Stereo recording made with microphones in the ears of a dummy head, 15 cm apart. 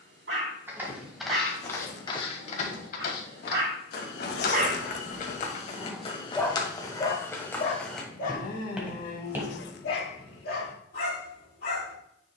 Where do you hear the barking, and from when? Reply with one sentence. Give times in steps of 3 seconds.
In this clip you hear the barking on the right from 0 s and on the left from 6 s.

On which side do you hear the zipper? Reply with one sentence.
In this clip you hear the zipper on the left.